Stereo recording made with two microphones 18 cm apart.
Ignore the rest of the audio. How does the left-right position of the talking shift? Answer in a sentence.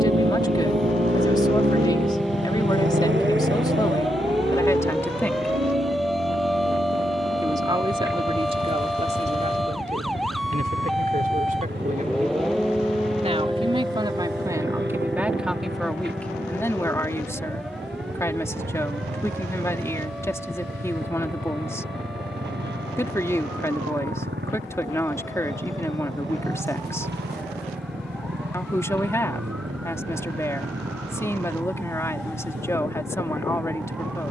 You can hear the talking go right and come back.